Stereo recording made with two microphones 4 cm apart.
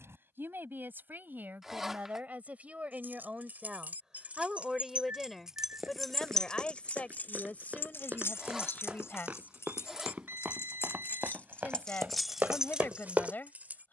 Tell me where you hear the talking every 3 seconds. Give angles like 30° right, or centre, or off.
40° right, 10° right, 30° left, 40° left, 40° left.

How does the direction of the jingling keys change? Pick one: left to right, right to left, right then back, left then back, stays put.
left then back.